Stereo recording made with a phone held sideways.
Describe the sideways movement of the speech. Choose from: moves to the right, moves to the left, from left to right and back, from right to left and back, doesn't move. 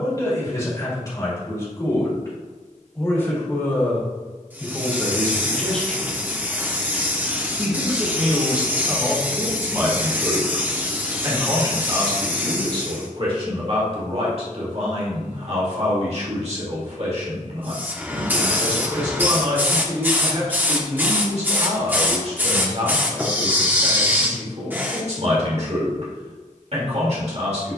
moves to the right.